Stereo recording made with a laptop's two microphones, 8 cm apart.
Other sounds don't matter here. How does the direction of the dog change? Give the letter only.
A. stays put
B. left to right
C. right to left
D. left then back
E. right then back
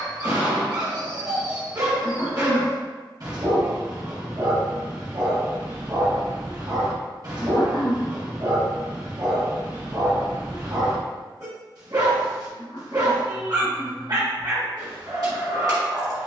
A.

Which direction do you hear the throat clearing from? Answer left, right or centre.
left.